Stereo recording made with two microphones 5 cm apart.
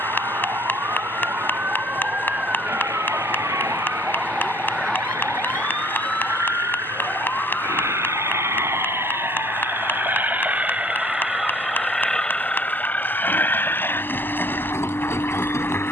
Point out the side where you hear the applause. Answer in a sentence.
You can hear the applause on the left.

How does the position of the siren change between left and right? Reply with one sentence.
In this clip you hear the siren go from the right side to the left.